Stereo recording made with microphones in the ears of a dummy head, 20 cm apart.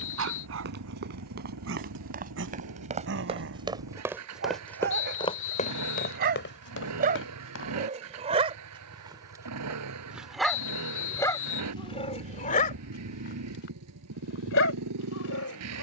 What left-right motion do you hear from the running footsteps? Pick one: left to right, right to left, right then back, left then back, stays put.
right to left.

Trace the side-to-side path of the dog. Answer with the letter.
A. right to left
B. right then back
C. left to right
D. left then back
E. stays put
A.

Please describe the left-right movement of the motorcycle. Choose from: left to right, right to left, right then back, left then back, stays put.
stays put.